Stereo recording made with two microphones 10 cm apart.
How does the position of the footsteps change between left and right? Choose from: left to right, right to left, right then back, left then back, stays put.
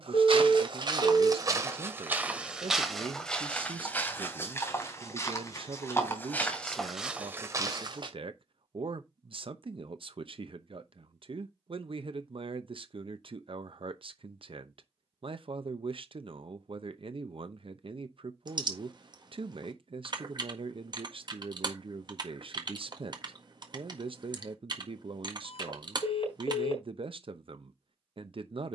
left then back.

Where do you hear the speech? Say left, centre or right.
right.